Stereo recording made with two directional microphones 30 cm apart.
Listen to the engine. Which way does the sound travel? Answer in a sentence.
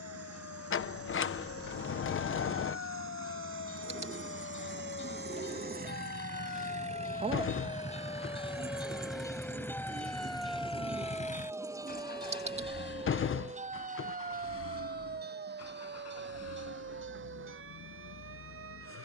In this clip you hear the engine move to the left.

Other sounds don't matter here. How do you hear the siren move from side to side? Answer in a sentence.
In this clip you hear the siren travel towards the right.